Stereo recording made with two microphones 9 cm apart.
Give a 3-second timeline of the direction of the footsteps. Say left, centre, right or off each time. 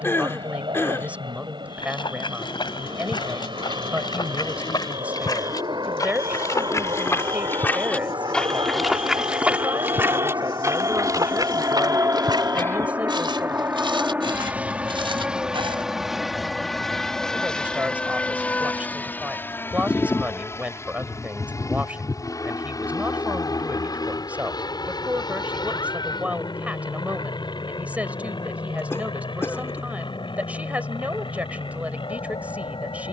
left, left, left, right, right, right, off, off, off, off, off.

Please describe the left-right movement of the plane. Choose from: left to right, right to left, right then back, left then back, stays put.
right to left.